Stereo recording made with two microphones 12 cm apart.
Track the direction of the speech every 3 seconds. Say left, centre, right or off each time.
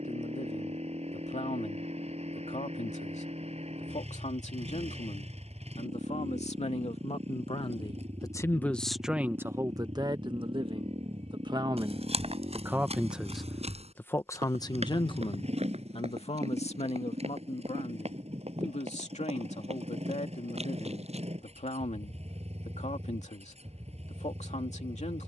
left, left, left, right, centre, left, left, left, left.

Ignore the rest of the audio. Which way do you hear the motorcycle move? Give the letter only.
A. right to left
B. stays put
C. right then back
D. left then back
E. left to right
B.